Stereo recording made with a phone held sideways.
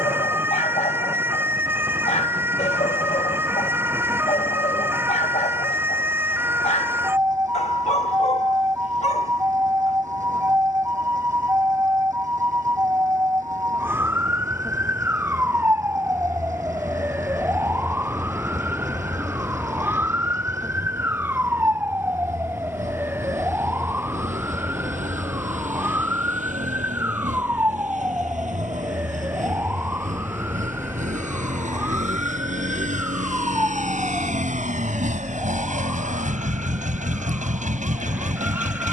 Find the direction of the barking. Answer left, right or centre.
left.